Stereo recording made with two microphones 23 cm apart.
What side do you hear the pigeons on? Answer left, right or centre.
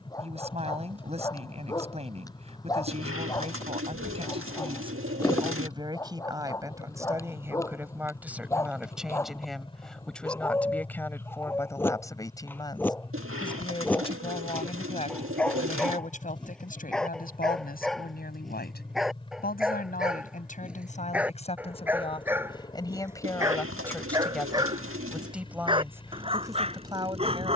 right.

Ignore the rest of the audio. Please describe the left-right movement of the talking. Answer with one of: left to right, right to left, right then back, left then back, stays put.
left then back.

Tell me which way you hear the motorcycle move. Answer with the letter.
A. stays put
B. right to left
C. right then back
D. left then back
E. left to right
A.